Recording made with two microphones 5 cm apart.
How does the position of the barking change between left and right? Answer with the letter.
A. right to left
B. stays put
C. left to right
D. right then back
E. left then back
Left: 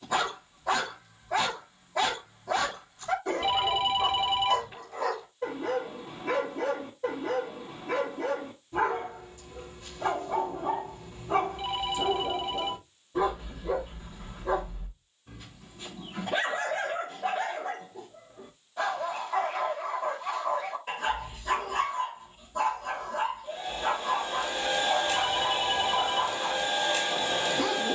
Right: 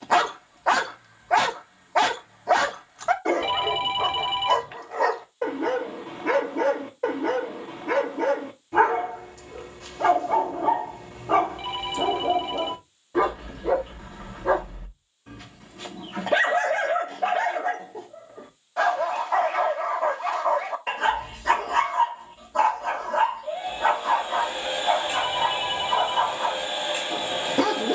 B.